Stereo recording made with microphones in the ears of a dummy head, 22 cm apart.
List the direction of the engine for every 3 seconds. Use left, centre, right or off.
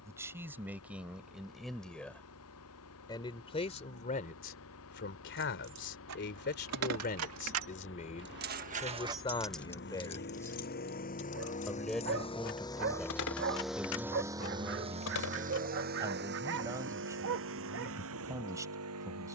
left, left, left, left, centre, right, right.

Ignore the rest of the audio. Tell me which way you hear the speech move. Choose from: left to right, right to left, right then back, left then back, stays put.
left then back.